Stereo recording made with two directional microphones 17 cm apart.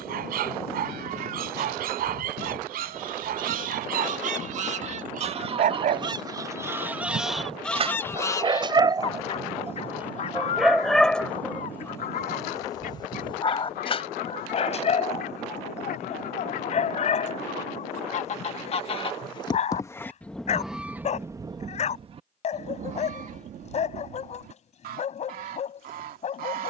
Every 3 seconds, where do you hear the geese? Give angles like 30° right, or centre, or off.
60° right, 50° right, centre, 50° left, 60° left, 60° left, 20° left, 40° right, 60° right.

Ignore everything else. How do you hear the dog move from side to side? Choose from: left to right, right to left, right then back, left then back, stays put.
right to left.